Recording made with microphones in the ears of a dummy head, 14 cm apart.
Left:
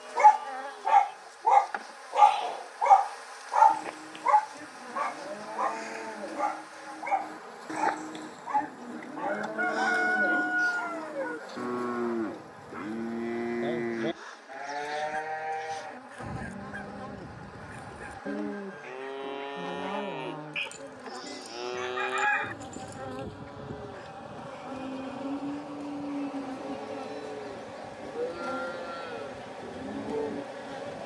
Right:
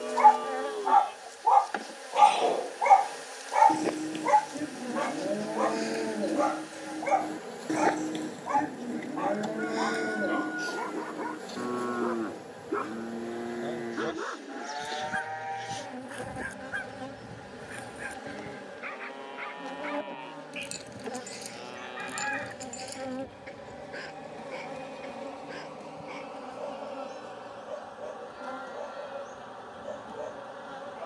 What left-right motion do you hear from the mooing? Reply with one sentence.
In this clip you hear the mooing move from right to left.